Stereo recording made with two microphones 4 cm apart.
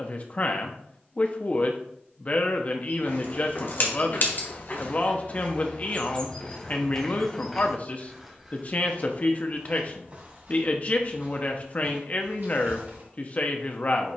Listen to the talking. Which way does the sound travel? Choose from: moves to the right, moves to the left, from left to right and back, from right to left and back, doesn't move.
doesn't move.